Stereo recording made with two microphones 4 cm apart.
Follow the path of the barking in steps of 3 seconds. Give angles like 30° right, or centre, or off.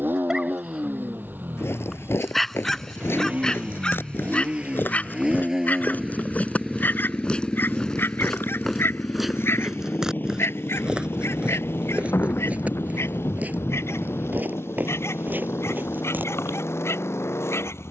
centre, 30° left, 60° left, 70° left, 80° left, 80° left.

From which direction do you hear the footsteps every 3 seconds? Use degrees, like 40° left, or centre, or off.
70° left, 50° left, 20° left, 20° right, 40° right, 50° right.